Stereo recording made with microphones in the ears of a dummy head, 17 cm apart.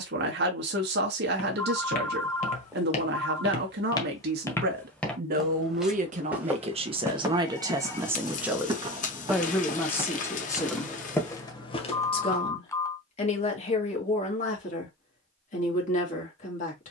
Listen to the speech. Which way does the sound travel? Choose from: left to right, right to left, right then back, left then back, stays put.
right to left.